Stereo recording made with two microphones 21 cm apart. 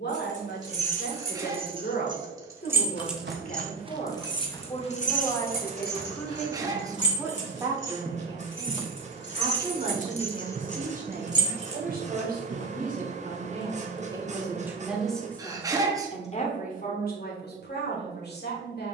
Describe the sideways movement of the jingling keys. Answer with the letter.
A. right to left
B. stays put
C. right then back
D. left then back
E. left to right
D.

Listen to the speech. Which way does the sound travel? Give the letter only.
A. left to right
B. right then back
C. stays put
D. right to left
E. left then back
B.